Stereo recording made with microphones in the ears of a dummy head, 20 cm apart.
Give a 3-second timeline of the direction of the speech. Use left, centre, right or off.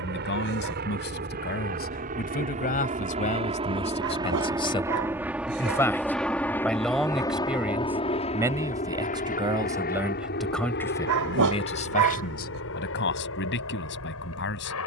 left, left, centre, centre, left.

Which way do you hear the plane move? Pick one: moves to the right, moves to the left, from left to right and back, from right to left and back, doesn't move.
moves to the left.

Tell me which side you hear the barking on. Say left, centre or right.
right.